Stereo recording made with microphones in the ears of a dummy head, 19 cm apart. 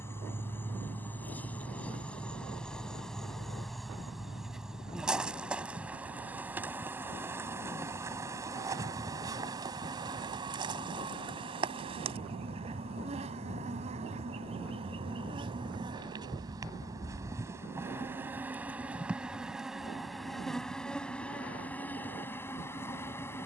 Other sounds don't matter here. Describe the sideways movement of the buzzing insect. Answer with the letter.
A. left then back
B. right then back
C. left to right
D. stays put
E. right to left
B.